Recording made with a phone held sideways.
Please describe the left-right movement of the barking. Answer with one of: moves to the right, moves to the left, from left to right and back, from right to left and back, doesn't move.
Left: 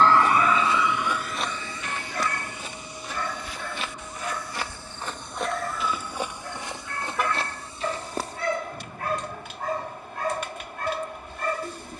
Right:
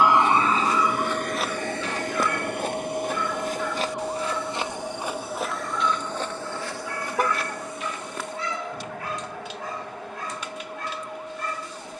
doesn't move.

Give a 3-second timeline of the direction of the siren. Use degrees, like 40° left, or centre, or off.
50° right, 70° right, 80° right, 80° right.